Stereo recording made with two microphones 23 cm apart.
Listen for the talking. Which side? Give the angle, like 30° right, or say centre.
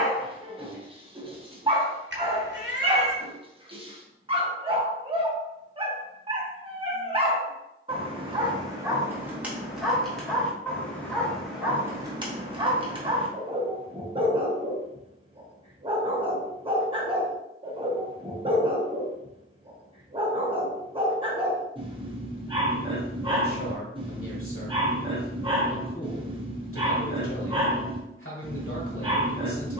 70° left.